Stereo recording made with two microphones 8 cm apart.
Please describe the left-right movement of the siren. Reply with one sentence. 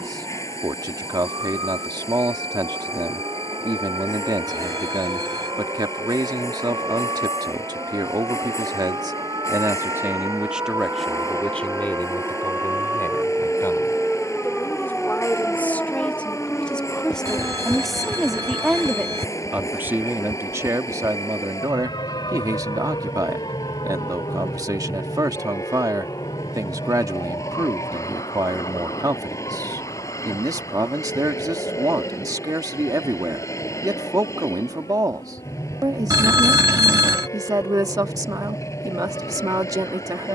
You can hear the siren go from the right side to the left.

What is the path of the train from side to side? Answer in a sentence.
You can hear the train stay put.